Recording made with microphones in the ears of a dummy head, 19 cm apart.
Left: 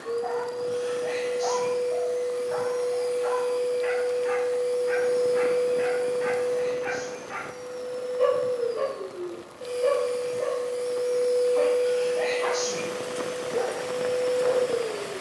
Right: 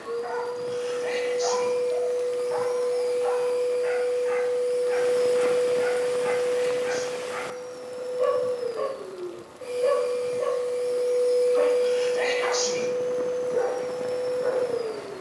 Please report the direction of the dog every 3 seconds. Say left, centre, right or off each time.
centre, left, left, centre, right.